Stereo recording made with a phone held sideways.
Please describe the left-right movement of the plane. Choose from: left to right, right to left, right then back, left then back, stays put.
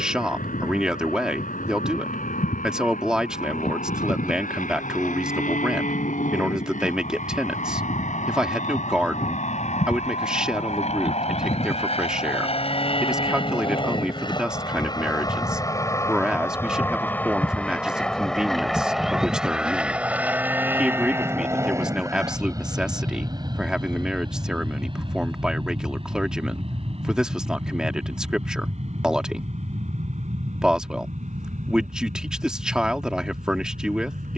left to right.